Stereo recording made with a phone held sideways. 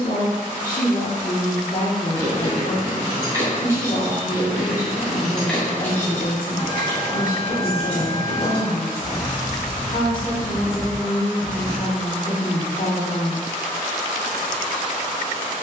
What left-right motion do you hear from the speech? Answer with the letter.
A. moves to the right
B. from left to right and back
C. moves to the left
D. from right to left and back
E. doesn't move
E.